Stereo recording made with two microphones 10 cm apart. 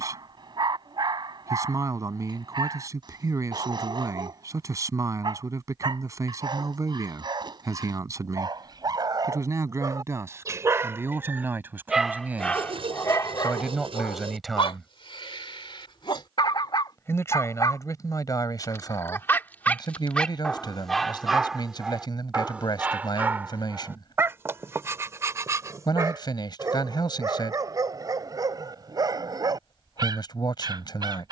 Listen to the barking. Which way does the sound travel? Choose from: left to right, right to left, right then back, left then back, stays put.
left then back.